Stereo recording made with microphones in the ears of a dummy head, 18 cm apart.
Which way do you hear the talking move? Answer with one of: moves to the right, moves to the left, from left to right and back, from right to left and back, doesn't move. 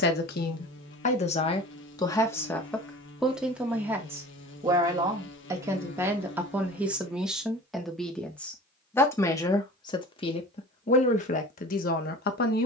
from left to right and back.